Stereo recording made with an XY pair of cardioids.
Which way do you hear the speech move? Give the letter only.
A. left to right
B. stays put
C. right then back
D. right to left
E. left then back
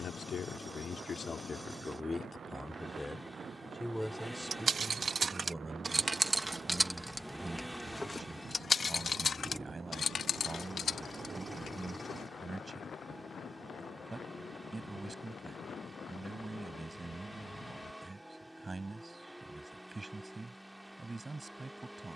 A.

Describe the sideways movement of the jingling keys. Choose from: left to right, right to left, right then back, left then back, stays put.
right to left.